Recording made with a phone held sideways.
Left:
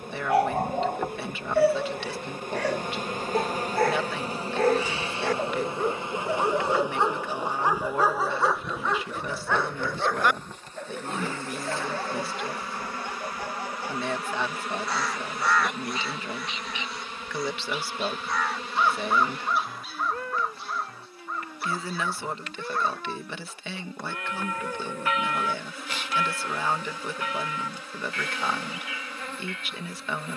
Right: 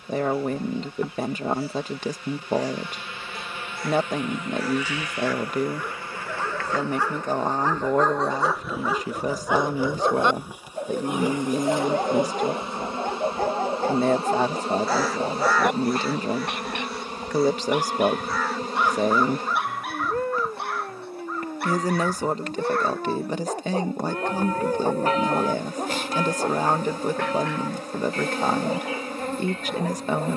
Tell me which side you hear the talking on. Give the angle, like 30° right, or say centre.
40° right.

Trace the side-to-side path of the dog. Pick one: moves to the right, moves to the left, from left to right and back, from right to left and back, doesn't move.
moves to the right.